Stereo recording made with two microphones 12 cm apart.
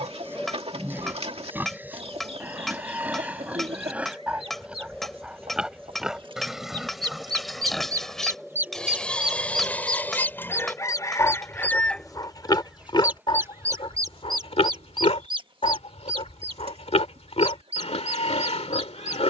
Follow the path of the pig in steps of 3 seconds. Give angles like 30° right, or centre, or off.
20° right, 10° right, centre, 20° left, 50° left, 60° left, 60° left.